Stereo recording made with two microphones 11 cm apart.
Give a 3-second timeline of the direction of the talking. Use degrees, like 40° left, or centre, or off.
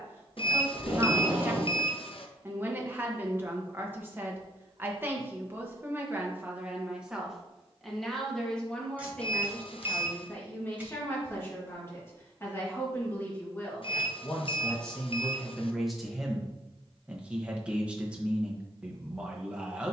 20° right, 20° right, centre, 20° left, 20° left, centre, 10° right.